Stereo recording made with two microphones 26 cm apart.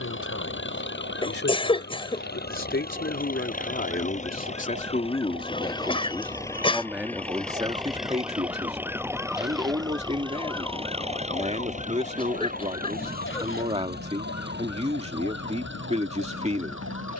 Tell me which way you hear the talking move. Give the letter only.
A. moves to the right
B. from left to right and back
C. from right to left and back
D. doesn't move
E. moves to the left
A.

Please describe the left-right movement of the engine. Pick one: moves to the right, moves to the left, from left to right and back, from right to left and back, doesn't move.
moves to the right.